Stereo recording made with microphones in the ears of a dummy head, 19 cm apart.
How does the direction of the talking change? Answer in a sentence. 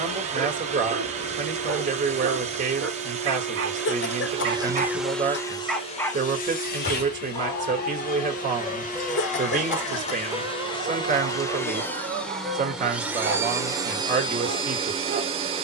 In this clip you hear the talking stay in one place.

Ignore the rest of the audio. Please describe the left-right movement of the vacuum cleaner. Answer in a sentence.
You can hear the vacuum cleaner move from right to left and back again.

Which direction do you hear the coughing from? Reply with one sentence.
You can hear the coughing on the left.